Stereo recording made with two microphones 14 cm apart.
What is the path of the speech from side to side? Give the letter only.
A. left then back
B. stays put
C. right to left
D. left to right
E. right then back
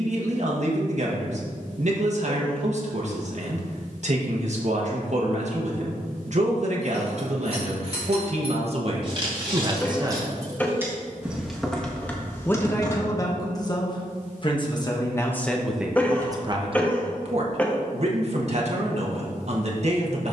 A.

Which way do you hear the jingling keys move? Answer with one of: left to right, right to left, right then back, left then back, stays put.
right to left.